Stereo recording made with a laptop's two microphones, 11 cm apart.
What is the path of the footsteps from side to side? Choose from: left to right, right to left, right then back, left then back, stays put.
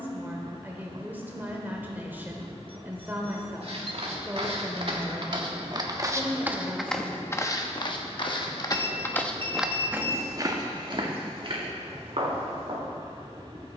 left then back.